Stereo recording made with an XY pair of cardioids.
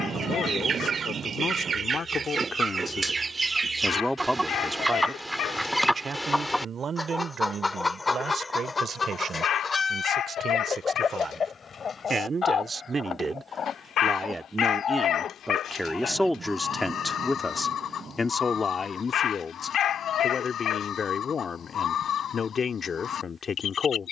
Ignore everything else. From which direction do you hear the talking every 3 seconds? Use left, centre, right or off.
left, centre, right, right, right, centre, left, left.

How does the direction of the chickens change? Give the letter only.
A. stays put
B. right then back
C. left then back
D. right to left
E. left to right
D.